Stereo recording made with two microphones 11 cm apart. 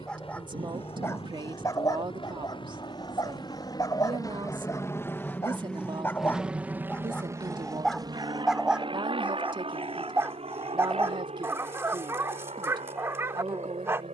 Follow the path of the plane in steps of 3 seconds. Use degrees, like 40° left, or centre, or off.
60° left, 30° left, 30° right, 60° right, 70° right.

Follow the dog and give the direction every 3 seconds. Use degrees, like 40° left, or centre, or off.
30° left, 30° left, 10° left, 20° right, 20° right.